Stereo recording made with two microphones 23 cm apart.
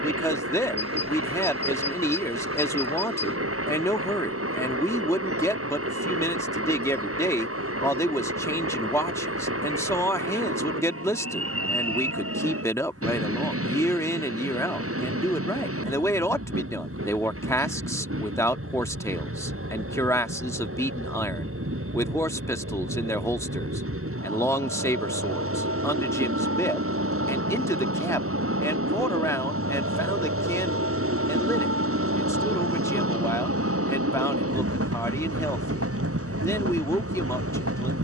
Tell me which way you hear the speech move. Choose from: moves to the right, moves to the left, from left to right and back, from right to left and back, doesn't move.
doesn't move.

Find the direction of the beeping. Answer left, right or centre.
right.